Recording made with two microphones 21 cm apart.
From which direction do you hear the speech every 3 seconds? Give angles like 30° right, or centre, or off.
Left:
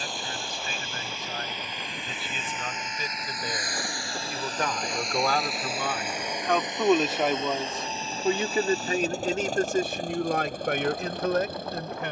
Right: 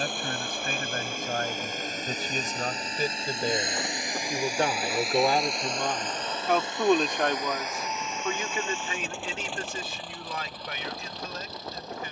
50° right, 30° right, 10° left, 60° left.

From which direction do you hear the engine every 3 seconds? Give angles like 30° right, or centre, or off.
50° right, 10° right, 20° left, 50° left.